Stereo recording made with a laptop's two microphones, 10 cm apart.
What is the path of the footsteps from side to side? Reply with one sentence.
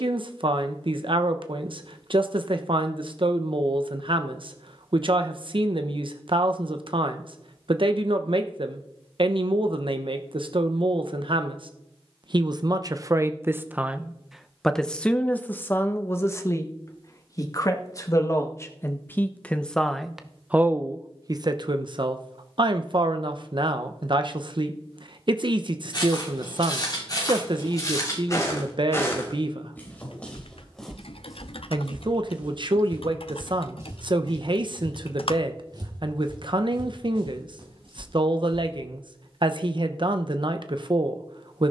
You can hear the footsteps travel towards the right.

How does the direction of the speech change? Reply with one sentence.
You can hear the speech go left and come back.